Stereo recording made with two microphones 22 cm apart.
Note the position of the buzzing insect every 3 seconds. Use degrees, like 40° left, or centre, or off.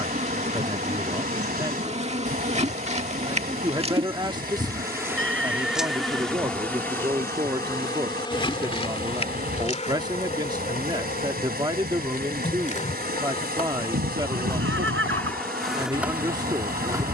30° right, 20° right, 10° left, 30° left, 20° left, 10° right.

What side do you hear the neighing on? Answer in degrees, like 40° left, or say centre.
60° right.